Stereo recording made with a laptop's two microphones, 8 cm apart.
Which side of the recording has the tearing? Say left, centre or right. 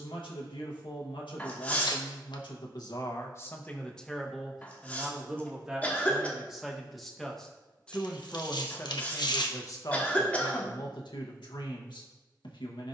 left.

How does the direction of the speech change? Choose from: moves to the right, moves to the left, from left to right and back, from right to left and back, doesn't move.
from left to right and back.